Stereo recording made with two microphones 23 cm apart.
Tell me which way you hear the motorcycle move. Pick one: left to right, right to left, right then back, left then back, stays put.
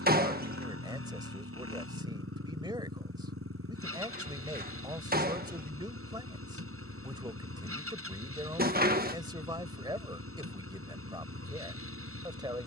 stays put.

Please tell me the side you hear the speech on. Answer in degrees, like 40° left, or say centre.
20° right.